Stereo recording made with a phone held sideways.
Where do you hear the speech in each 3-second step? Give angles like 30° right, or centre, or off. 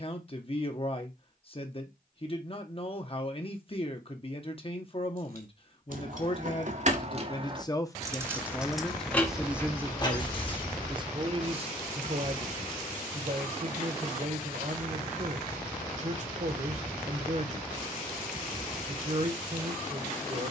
40° left, 40° left, 30° left, 20° right, 50° right, 50° right, 50° right.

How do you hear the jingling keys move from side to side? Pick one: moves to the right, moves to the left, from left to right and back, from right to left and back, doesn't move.
moves to the left.